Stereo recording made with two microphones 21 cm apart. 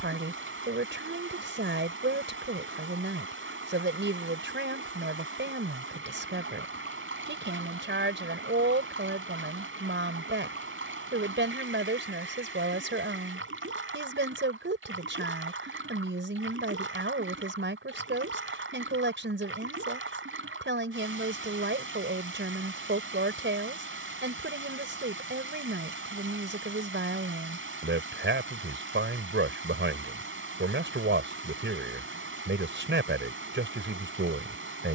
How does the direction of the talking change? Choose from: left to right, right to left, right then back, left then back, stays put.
stays put.